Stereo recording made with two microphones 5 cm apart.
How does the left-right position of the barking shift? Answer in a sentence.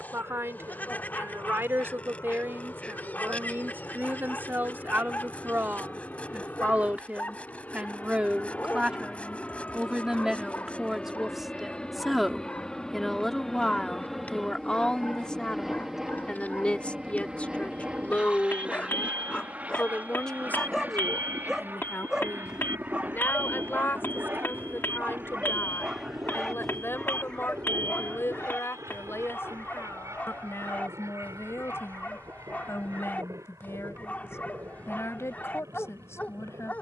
In this clip you hear the barking move from left to right and back again.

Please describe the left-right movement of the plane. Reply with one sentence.
You can hear the plane move from left to right.